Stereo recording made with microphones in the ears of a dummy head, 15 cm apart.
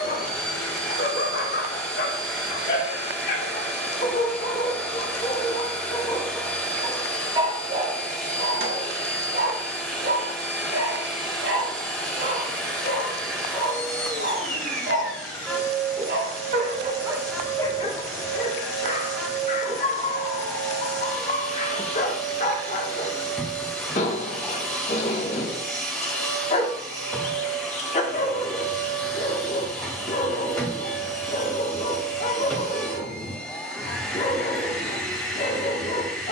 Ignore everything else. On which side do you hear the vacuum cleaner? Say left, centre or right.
centre.